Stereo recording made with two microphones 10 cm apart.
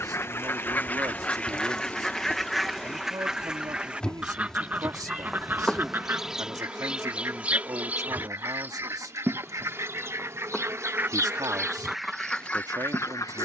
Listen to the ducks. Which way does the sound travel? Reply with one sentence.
In this clip you hear the ducks move from left to right and back again.